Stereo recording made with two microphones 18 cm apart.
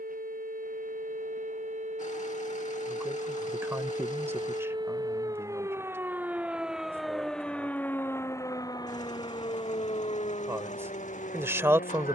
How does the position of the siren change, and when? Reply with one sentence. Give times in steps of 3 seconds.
In this clip you hear the siren on the right from 0 s, in the centre from 6 s and on the left from 9 s.